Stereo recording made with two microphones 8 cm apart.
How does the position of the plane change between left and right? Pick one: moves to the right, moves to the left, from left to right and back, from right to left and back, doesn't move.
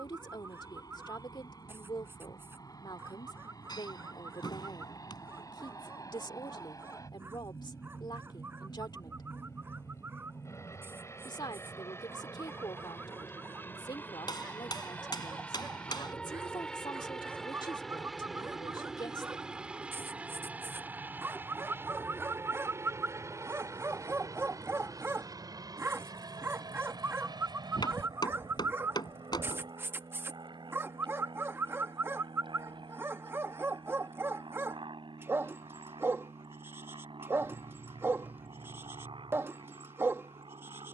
moves to the right.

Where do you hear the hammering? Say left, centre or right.
left.